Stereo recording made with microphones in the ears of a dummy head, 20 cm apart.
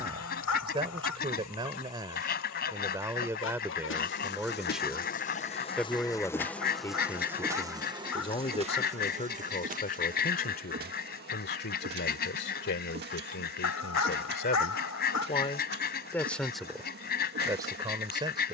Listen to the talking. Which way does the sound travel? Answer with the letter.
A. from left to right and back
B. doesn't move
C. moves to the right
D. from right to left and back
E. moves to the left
D.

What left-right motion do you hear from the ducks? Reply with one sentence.
In this clip you hear the ducks stay put.